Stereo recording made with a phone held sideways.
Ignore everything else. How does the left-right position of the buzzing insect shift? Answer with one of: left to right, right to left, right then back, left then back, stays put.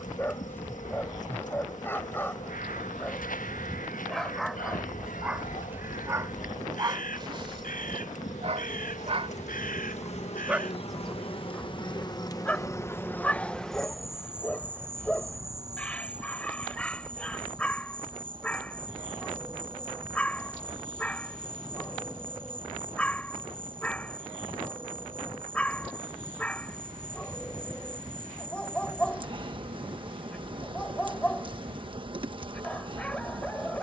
left to right.